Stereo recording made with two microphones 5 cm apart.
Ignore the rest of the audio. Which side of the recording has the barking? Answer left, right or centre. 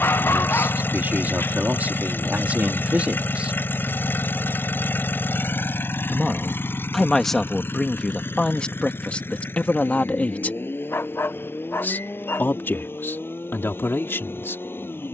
left.